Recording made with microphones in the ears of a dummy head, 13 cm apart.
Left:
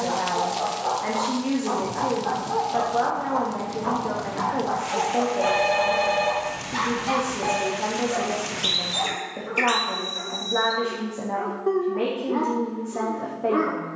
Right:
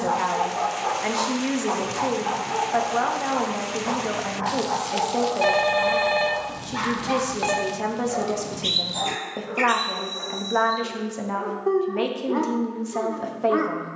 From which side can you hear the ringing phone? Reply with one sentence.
In this clip you hear the ringing phone on the right.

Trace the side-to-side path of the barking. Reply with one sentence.
In this clip you hear the barking go left and come back.